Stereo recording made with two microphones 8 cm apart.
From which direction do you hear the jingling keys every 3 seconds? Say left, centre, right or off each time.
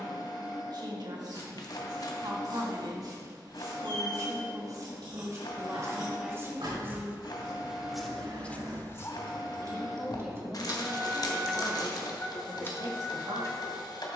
off, right, right, right, left.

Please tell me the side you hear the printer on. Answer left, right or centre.
left.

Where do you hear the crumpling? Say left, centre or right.
left.